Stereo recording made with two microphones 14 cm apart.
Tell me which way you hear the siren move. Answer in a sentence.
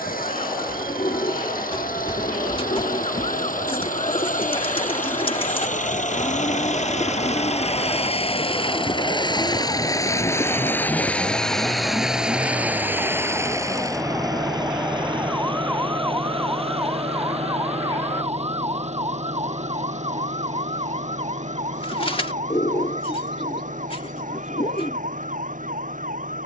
In this clip you hear the siren move from left to right.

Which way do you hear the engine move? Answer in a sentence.
You can hear the engine go from the left side to the right.